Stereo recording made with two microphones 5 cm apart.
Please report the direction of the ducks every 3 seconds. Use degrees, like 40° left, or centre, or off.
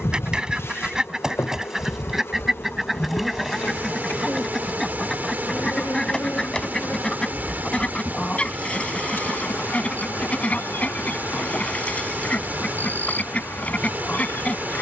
10° right, centre, 20° left, 30° left, 30° left.